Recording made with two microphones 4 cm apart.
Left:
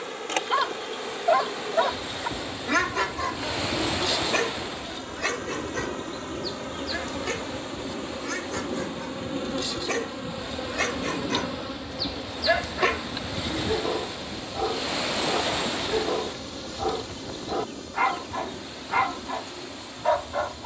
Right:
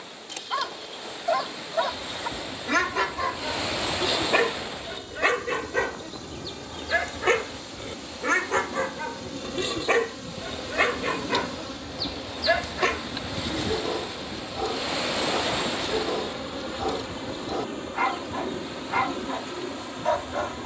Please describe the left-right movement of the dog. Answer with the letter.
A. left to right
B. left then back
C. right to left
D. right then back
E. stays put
D.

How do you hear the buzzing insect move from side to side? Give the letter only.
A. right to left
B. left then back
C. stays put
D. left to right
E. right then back
D.